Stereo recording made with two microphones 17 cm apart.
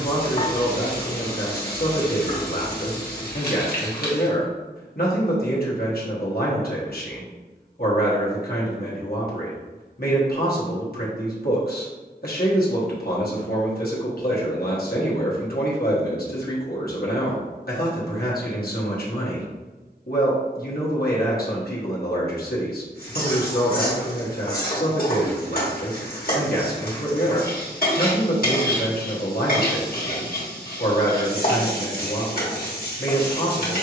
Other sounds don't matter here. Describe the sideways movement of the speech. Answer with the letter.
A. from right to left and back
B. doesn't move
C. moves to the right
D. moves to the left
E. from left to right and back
B.